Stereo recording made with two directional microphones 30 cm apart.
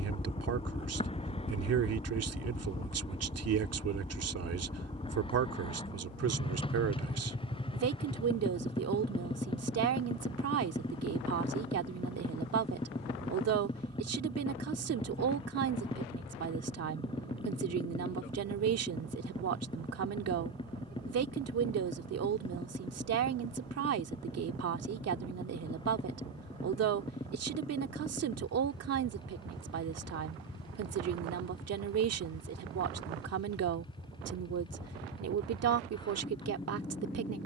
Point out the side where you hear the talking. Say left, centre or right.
right.